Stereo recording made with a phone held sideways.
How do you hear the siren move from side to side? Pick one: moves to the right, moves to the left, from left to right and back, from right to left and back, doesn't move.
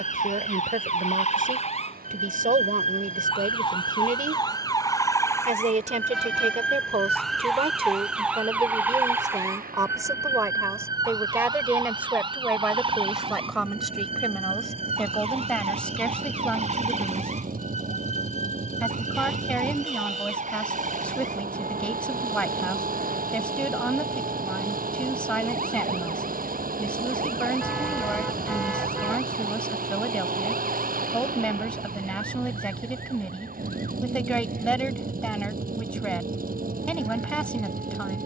moves to the right.